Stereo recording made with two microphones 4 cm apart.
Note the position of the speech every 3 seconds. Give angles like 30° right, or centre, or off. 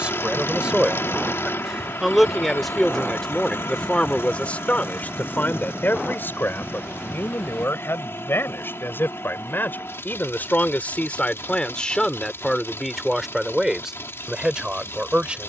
10° right, 30° left, 70° left, 40° left, centre.